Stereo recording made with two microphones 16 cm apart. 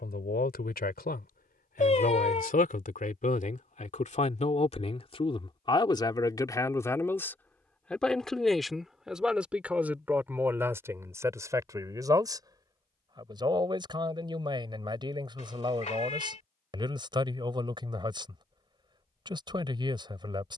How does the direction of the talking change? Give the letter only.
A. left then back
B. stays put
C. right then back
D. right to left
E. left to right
E.